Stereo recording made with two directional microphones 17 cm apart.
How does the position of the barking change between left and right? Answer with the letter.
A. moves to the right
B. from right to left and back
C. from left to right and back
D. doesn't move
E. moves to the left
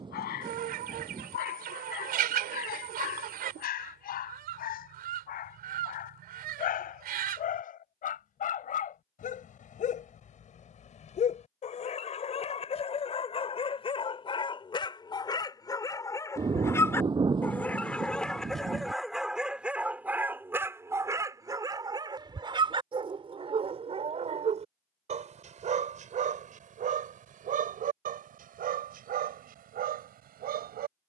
A.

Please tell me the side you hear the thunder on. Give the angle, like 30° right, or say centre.
30° right.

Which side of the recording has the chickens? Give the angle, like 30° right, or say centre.
60° right.